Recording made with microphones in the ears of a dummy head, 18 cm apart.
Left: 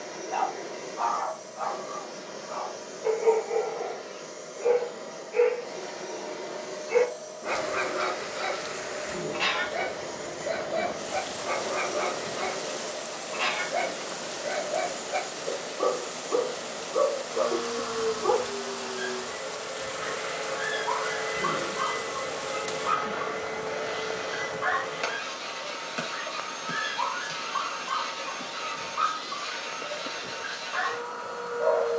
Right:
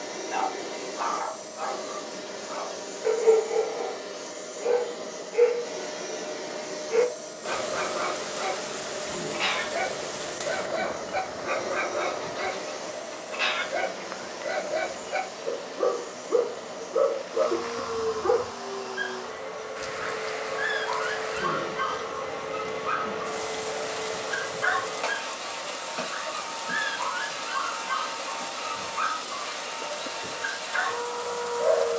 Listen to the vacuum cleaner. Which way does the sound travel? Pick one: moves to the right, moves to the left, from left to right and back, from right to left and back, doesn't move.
moves to the left.